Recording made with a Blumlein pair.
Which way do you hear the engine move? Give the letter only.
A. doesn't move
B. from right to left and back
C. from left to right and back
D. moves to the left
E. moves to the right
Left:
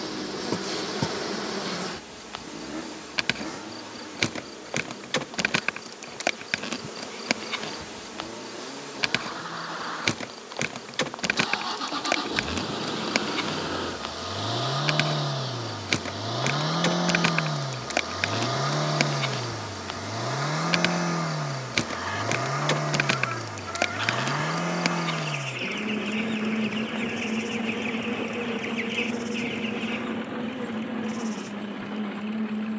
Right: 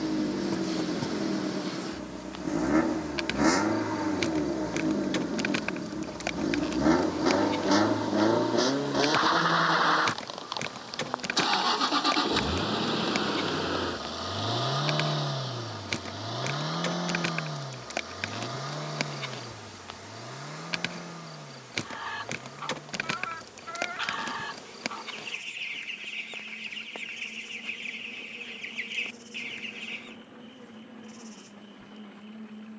D.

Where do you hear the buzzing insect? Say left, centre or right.
left.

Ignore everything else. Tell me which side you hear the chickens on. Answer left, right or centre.
centre.